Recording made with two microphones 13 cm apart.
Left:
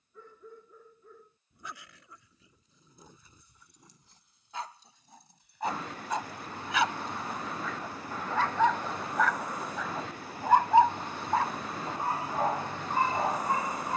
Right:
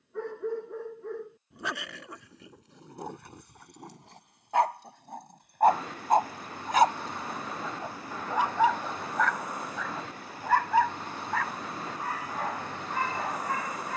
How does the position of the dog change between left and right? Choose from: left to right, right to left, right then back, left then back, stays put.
right to left.